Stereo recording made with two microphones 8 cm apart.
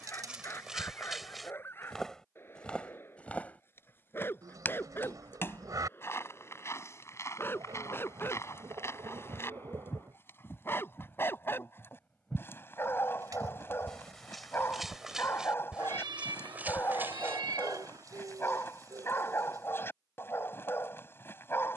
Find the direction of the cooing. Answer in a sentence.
In this clip you hear the cooing on the right.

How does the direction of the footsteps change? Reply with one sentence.
You can hear the footsteps move from right to left and back again.